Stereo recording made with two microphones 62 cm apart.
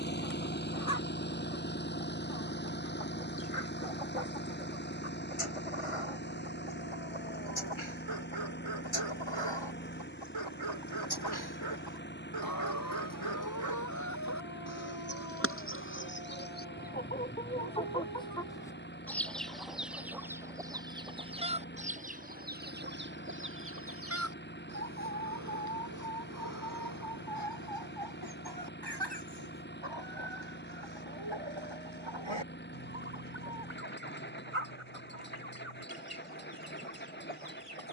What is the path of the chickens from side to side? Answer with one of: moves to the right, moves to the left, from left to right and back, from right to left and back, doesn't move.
moves to the right.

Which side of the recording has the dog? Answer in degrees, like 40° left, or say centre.
50° right.